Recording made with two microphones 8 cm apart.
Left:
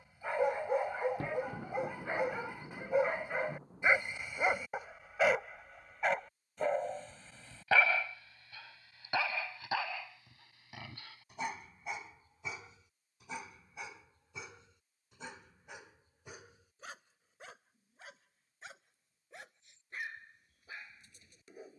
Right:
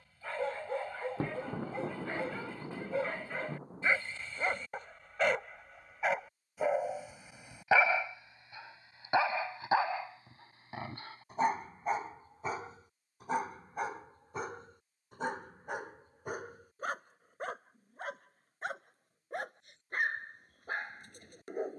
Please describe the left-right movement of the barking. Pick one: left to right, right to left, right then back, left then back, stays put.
left to right.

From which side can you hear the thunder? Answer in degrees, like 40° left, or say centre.
30° right.